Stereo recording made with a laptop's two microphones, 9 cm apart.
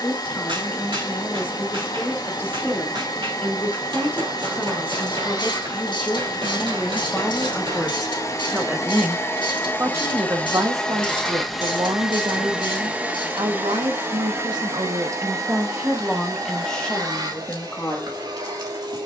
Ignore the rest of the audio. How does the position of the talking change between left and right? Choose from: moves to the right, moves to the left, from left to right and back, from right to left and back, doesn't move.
from left to right and back.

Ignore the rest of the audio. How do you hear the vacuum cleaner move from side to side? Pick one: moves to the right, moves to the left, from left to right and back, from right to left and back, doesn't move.
moves to the right.